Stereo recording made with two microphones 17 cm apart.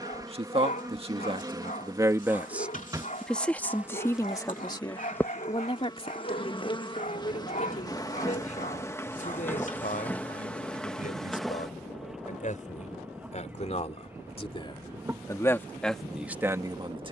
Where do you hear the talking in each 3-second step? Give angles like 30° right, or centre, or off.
30° right, 20° left, 40° left, 50° left, 40° left, 10° right.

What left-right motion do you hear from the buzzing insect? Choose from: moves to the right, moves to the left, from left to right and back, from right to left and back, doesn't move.
from right to left and back.